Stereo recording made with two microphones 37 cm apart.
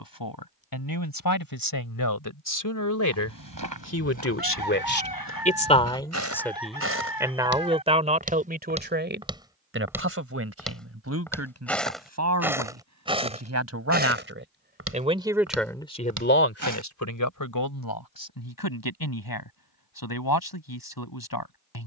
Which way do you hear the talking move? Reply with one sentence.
In this clip you hear the talking move from left to right and back again.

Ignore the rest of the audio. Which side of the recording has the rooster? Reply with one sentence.
In this clip you hear the rooster on the left.